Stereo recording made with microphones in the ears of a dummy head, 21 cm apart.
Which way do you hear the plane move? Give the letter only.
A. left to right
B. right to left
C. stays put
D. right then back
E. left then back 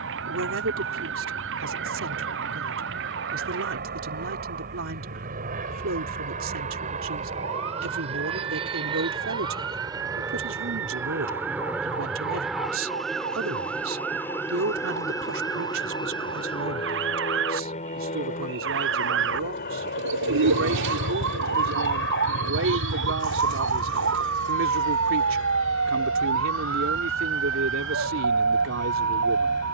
B.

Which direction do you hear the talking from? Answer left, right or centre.
right.